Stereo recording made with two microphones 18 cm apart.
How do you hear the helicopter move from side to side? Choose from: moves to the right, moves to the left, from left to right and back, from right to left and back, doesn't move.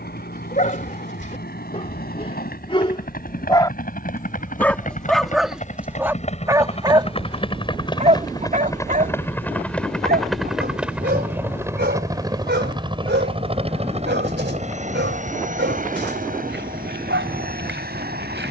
moves to the right.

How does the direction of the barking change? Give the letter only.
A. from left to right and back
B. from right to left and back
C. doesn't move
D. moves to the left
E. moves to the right
E.